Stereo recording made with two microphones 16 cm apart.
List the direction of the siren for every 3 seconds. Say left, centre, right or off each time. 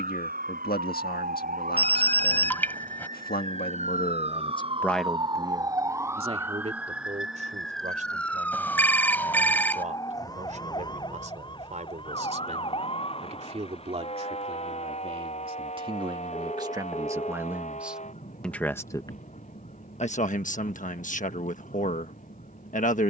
right, right, centre, left, left, left, left, left.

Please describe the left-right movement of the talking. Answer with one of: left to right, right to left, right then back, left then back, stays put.
right then back.